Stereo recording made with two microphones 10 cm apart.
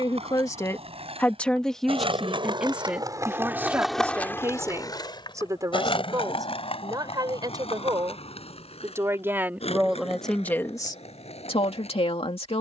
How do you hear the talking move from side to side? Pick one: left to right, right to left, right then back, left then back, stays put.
right then back.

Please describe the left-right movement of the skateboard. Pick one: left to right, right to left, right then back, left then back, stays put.
right to left.